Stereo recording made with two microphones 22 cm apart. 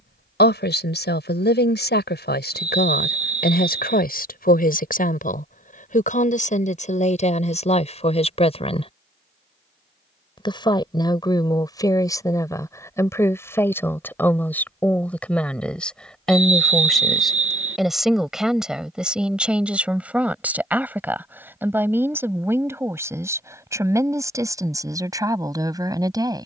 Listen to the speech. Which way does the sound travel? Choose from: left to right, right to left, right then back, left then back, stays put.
left to right.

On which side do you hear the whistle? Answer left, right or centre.
right.